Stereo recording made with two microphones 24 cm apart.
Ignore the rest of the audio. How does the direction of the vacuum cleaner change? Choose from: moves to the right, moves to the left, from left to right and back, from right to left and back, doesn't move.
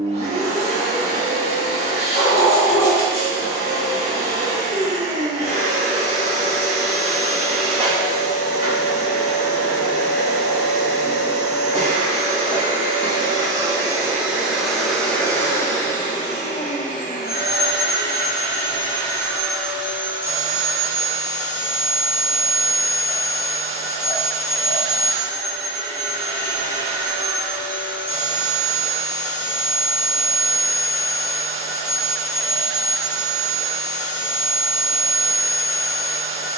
from right to left and back.